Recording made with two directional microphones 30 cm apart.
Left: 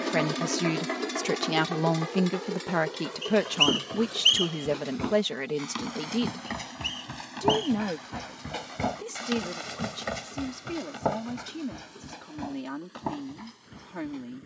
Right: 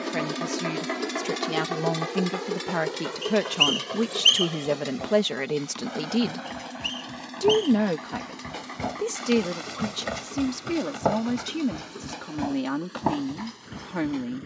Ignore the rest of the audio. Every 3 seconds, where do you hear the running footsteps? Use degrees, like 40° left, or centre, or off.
off, 50° left, 30° left, 20° right, 50° right.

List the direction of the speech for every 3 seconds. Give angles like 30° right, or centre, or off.
20° left, 10° right, 40° right, 50° right, 50° right.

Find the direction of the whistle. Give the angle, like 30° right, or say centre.
10° right.